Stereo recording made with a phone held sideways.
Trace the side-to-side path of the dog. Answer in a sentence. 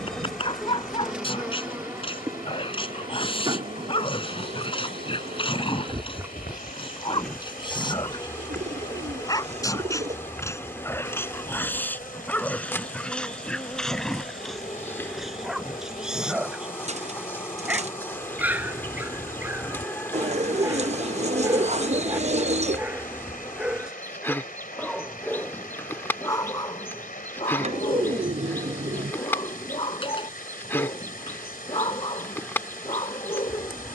You can hear the dog move from left to right and back again.